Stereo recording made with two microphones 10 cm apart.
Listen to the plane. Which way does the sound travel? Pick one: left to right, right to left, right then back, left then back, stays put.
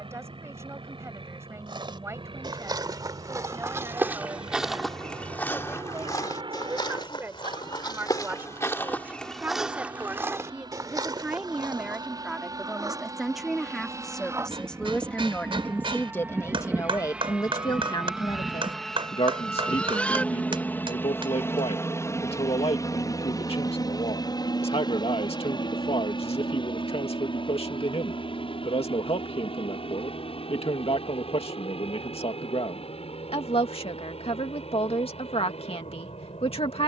right to left.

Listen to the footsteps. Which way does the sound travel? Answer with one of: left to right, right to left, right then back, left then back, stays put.
left then back.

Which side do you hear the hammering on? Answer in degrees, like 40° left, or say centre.
60° right.